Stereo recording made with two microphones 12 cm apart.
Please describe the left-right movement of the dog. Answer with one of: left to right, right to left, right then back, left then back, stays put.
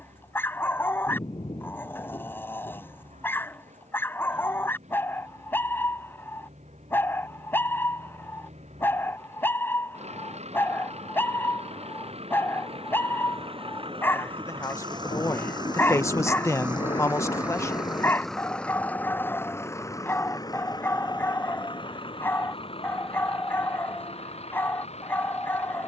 stays put.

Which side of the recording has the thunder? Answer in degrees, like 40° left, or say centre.
40° left.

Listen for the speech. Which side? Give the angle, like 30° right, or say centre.
20° left.